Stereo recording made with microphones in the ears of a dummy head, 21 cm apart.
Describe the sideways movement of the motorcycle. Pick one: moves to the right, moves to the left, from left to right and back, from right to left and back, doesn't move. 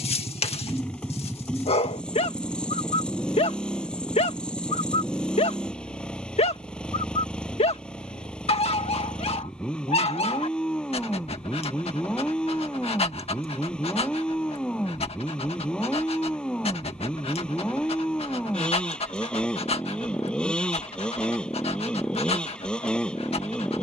doesn't move.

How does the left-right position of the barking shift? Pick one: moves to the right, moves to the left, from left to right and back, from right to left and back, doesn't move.
doesn't move.